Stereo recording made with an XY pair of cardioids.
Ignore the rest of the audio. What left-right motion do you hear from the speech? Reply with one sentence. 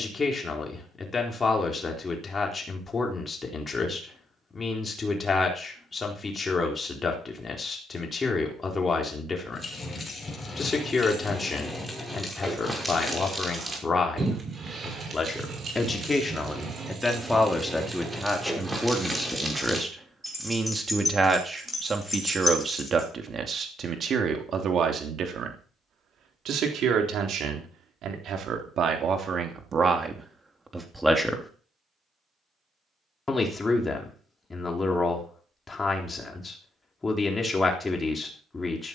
In this clip you hear the speech move from left to right and back again.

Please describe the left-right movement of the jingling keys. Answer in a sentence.
In this clip you hear the jingling keys go right and come back.